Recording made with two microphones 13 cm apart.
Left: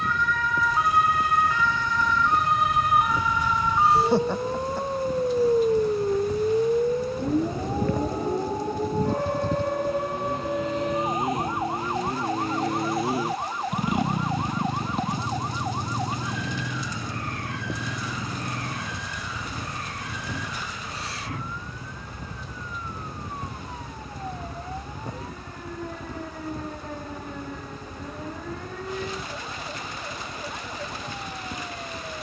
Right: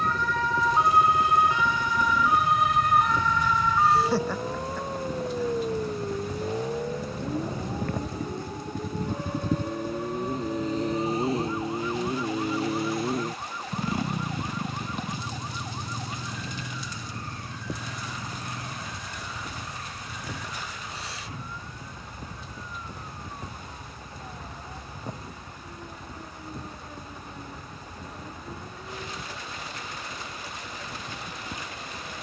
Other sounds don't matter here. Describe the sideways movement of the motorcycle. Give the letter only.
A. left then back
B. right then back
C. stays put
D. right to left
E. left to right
D.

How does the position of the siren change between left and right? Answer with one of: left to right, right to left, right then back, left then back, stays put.
right to left.